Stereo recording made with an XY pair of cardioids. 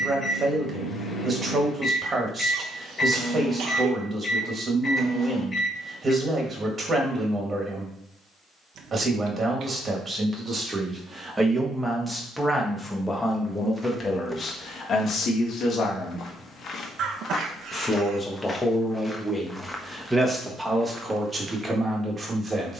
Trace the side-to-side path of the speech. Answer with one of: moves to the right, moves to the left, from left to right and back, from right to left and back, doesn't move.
from right to left and back.